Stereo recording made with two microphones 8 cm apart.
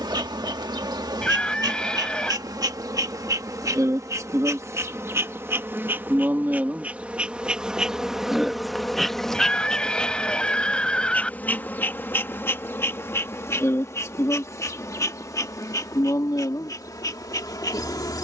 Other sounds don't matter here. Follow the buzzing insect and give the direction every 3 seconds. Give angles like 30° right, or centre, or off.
50° right, 40° right, 10° right, 10° left, 30° left, 40° left.